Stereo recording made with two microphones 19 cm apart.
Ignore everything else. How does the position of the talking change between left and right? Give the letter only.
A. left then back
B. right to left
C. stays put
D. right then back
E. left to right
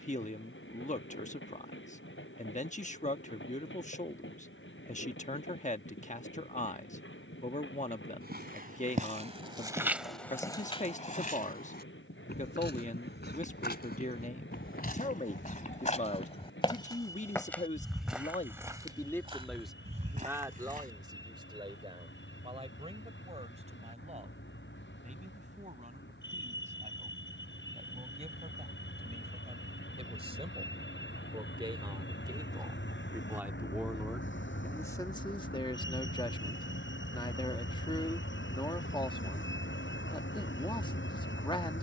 D.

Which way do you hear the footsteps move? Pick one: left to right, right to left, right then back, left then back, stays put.
left then back.